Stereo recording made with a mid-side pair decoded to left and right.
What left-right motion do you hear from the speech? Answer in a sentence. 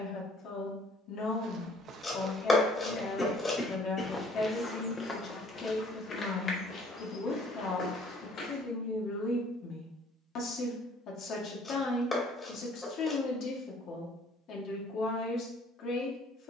You can hear the speech stay put.